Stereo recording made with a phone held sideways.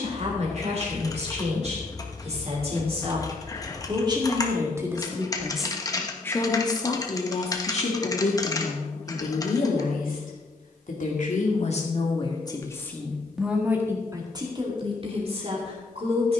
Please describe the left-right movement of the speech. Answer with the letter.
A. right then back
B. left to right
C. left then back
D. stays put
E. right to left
C.